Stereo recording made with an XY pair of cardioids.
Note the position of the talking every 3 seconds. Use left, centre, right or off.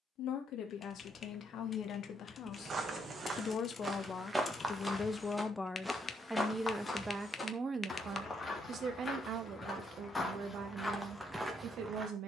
left, left, right, right.